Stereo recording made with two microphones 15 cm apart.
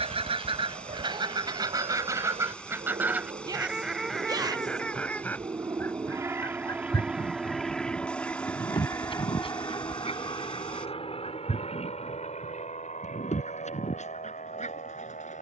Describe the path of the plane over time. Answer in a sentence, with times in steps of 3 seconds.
You can hear the plane on the right from 0 s, in the centre from 6 s and on the left from 9 s.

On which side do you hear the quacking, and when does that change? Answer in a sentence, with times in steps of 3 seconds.
In this clip you hear the quacking on the right from 0 s, in the centre from 3 s and on the left from 6 s.